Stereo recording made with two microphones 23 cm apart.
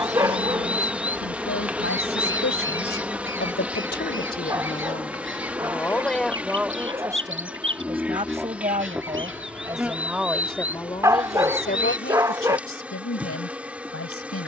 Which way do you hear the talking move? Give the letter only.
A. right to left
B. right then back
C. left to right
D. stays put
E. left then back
B.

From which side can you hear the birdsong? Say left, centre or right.
right.